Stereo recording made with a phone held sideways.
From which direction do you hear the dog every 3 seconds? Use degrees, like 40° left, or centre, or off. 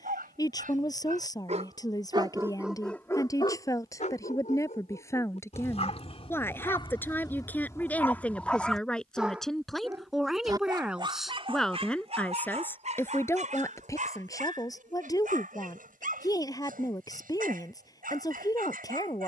40° right, 40° left, 20° left, 30° right, 50° right, 60° right, 60° right.